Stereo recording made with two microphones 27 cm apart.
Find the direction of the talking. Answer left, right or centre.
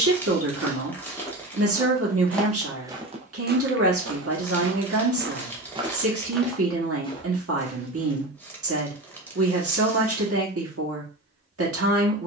right.